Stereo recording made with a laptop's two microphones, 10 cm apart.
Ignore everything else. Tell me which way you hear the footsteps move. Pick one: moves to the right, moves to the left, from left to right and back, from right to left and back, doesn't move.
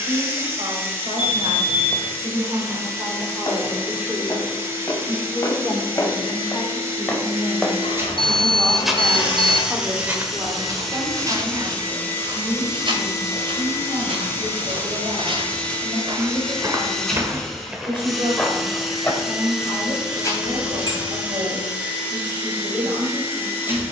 from left to right and back.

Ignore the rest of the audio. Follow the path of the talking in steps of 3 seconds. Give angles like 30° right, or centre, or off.
50° right, 10° right, 10° left, 30° right, 50° right, 50° right, 50° right, 50° right.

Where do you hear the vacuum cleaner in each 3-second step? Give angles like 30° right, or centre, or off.
20° right, 20° right, 20° right, centre, 20° left, 10° left, 10° right, 20° right.